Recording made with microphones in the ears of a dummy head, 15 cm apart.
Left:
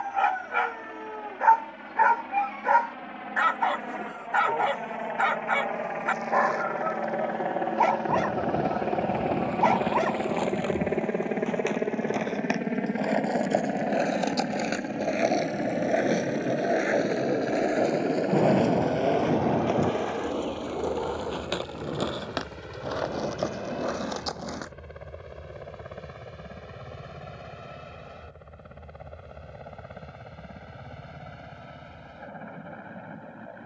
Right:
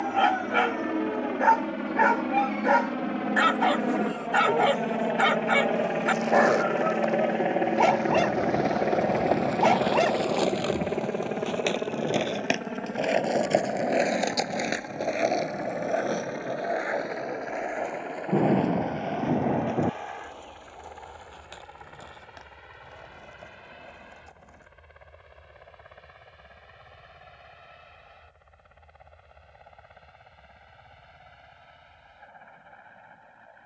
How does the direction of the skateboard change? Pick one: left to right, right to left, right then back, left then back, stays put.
right to left.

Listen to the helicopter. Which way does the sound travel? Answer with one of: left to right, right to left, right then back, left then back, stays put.
right to left.